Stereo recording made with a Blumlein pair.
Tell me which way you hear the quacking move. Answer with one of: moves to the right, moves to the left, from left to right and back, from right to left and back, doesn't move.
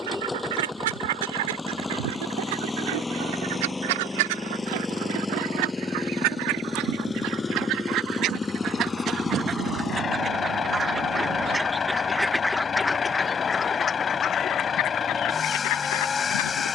moves to the left.